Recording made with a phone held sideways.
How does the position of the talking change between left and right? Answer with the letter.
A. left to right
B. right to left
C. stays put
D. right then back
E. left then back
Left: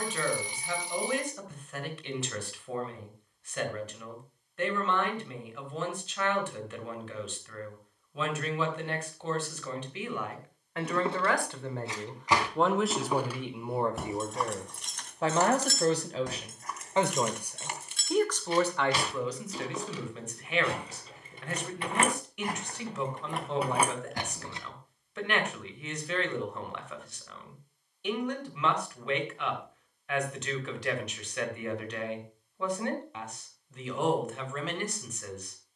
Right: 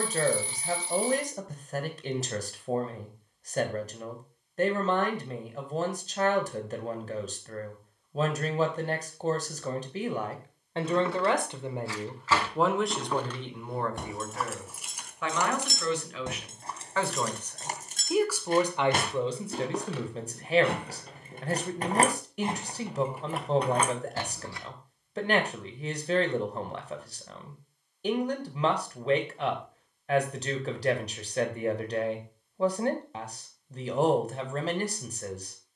E.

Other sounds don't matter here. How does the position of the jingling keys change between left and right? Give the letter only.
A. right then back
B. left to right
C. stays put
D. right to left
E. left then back
A.